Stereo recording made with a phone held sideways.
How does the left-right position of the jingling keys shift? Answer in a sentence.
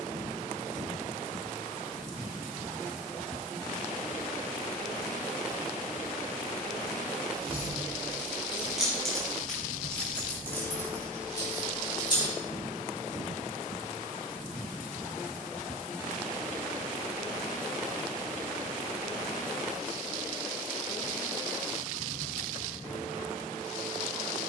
In this clip you hear the jingling keys go from the right side to the left.